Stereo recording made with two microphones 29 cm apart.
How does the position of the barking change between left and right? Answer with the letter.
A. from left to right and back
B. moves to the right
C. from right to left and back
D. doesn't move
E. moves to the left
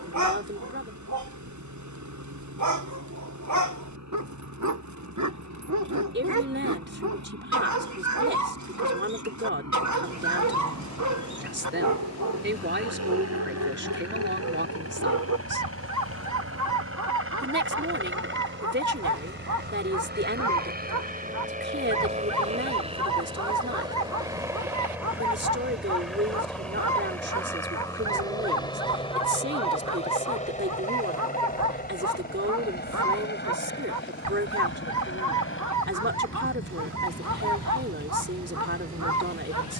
D.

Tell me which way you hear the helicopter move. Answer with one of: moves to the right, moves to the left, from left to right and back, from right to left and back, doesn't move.
moves to the left.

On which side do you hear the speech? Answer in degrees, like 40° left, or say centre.
40° right.